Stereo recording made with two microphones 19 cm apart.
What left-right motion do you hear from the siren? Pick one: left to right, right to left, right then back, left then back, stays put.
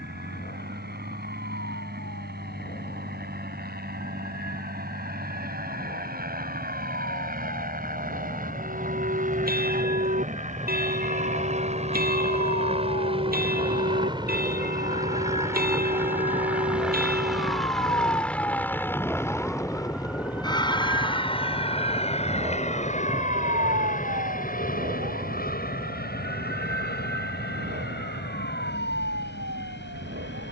left to right.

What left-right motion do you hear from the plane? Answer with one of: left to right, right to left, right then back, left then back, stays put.
right to left.